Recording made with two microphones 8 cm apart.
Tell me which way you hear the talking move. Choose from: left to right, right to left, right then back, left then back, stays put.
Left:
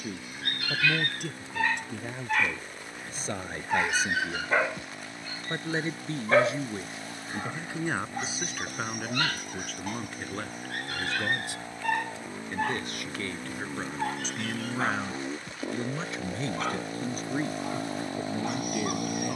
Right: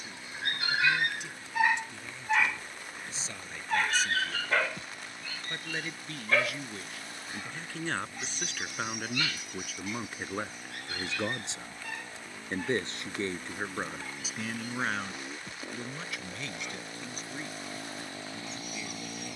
right then back.